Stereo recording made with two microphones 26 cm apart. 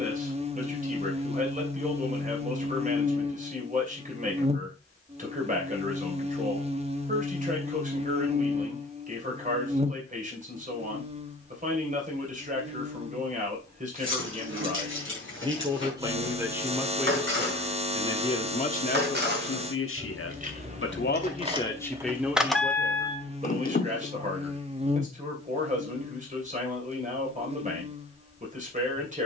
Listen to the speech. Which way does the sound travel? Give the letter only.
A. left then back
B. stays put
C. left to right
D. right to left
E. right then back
A.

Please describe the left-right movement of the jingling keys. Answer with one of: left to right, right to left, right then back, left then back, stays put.
right to left.